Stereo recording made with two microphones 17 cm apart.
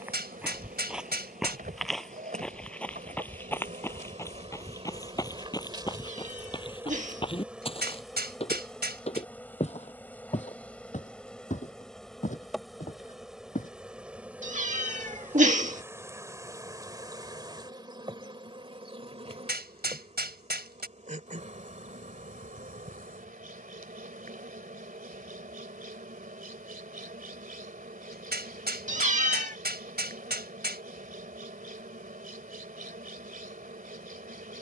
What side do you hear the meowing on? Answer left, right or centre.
right.